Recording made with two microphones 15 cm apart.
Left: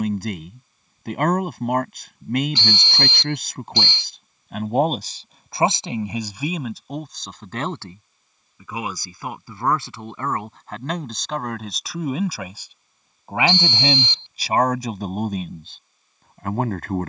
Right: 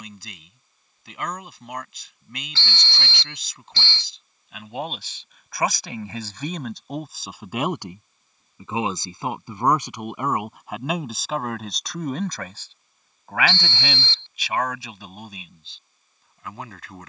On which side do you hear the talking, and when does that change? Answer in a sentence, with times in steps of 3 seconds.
You can hear the talking on the left from 0 s, in the centre from 6 s and on the left from 12 s.